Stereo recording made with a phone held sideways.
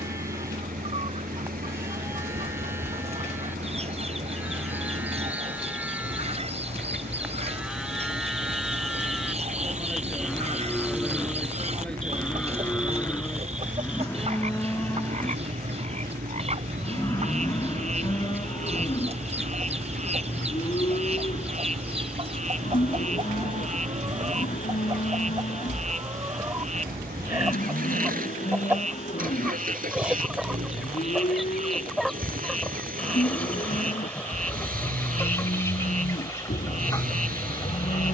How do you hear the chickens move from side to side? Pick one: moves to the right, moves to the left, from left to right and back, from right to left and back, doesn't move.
moves to the left.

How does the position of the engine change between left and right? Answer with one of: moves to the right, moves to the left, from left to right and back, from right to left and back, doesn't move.
doesn't move.